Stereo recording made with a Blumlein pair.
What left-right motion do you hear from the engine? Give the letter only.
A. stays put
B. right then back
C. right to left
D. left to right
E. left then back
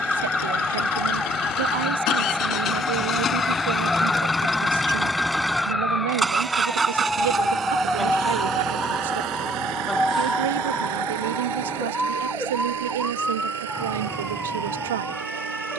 D.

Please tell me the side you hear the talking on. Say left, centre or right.
right.